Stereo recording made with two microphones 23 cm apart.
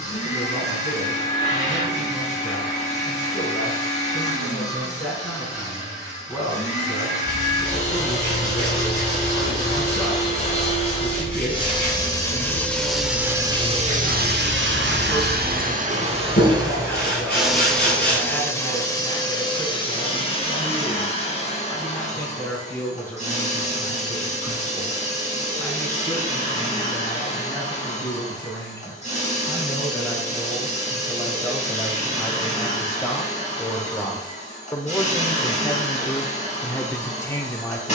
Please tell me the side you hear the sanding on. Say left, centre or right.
left.